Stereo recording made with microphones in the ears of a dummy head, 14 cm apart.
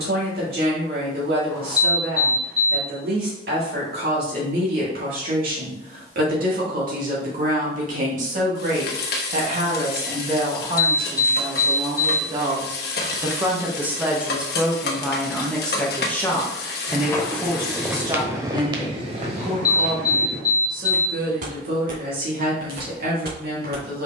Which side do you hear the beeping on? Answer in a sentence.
You can hear the beeping on the left.